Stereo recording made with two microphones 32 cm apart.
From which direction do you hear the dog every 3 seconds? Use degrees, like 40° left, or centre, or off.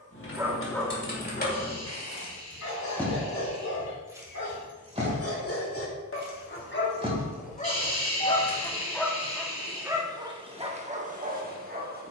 30° left, 50° left, 20° left, 20° right.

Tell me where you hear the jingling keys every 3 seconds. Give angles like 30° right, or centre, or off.
30° left, 10° right, centre, off.